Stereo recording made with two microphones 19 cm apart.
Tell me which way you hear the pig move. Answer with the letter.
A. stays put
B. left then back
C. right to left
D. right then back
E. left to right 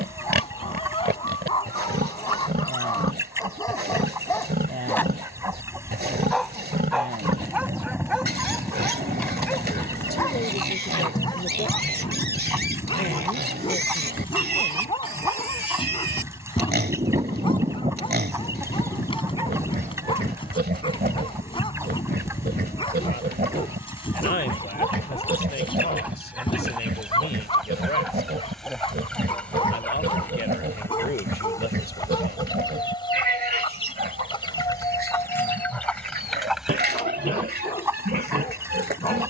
A.